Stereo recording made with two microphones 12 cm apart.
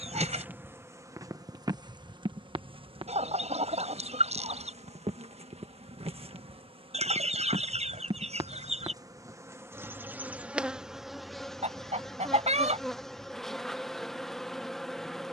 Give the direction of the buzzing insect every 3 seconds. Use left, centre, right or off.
right, right, right, centre, centre.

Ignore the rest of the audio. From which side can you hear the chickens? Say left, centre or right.
right.